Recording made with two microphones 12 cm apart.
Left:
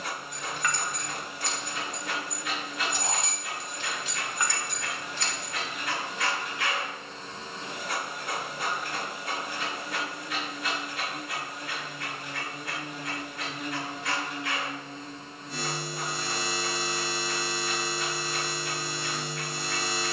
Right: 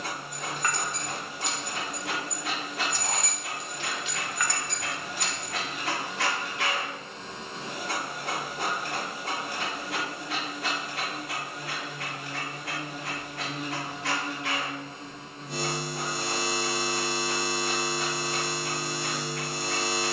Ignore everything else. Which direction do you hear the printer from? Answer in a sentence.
In this clip you hear the printer on the right.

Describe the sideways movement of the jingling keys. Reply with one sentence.
In this clip you hear the jingling keys go left and come back.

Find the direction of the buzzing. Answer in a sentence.
You can hear the buzzing on the right.